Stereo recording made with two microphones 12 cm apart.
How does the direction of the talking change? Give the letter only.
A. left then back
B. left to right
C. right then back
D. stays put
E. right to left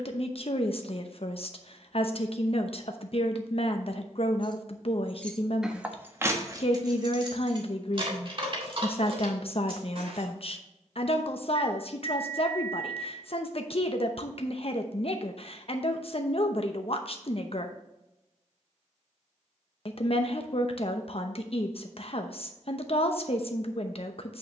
D.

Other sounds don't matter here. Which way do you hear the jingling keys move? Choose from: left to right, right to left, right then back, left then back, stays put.
left to right.